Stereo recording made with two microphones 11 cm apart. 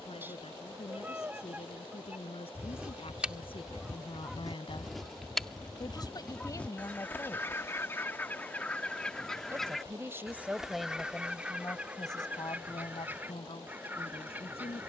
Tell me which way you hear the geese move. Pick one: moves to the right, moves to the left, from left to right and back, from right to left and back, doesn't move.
from right to left and back.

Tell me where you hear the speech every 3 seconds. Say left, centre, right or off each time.
left, left, left, centre, left.